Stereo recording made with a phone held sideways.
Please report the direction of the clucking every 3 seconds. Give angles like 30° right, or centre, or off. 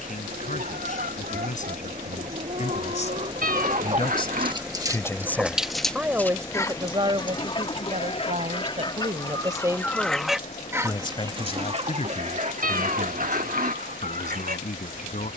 70° right, 30° right, 30° left, 10° right, 70° right.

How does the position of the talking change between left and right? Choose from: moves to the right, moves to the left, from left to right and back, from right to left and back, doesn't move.
from left to right and back.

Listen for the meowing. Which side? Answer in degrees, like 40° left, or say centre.
70° right.